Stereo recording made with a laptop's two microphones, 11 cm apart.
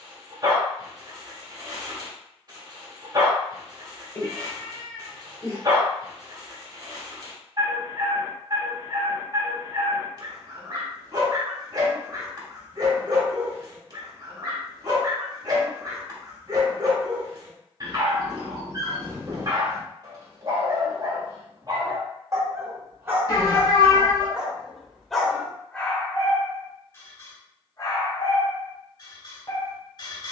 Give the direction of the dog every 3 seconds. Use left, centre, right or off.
right, right, right, right, right, right, right, right, centre, left.